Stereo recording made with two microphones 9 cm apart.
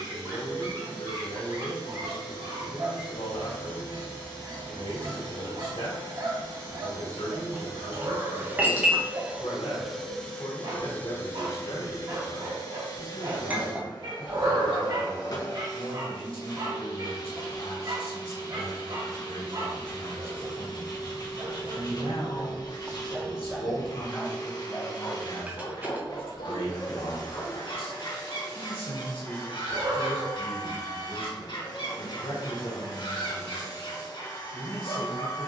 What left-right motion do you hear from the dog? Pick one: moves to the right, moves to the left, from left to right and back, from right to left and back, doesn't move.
moves to the left.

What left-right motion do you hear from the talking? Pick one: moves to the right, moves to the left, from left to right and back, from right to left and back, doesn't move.
doesn't move.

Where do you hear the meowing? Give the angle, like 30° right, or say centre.
70° right.